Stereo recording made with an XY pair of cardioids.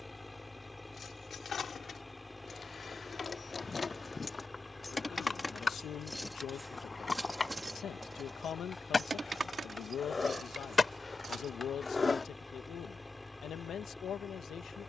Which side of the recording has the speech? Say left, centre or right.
left.